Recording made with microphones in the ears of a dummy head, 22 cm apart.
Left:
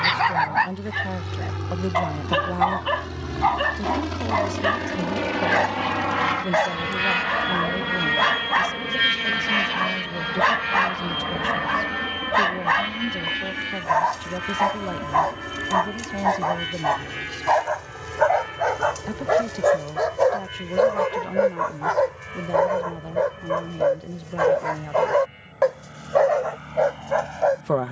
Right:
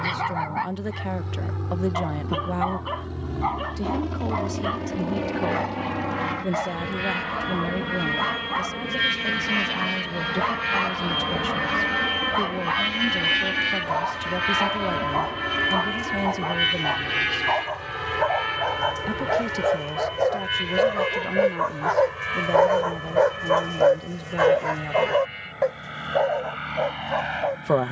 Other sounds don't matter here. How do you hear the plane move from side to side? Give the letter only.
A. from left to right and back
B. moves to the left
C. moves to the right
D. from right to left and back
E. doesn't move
C.